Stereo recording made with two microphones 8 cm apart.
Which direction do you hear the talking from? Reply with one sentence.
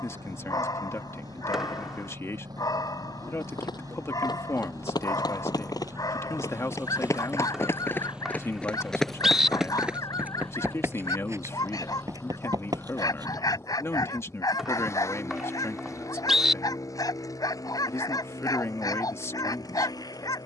In this clip you hear the talking on the left.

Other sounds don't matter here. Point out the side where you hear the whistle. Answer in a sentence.
In this clip you hear the whistle in the centre.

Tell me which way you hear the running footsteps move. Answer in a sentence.
In this clip you hear the running footsteps go from the left side to the right.